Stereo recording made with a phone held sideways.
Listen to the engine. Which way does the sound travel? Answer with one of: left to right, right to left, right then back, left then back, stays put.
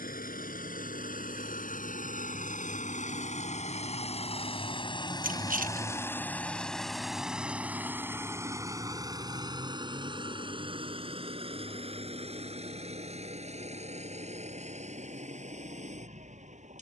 left to right.